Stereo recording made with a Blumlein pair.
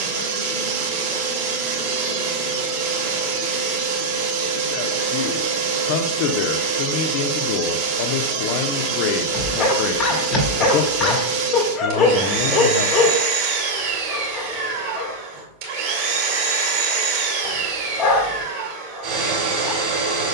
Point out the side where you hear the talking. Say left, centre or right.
left.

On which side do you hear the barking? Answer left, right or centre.
left.